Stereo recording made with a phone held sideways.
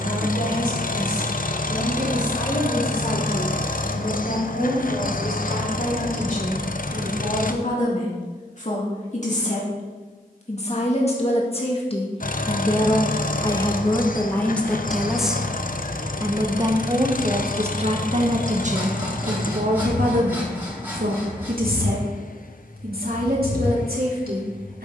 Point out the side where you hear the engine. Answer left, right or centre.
left.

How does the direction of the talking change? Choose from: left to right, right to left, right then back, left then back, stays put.
left to right.